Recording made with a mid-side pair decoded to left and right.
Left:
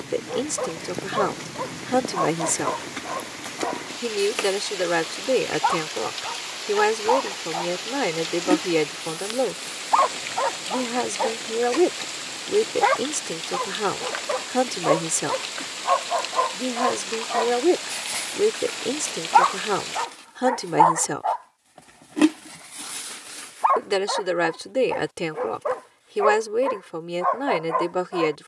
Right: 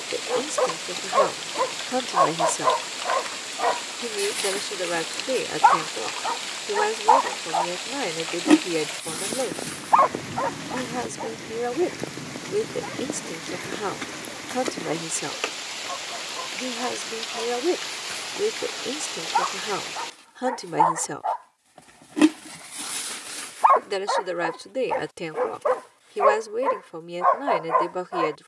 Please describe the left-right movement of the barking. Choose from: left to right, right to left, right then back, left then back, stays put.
left then back.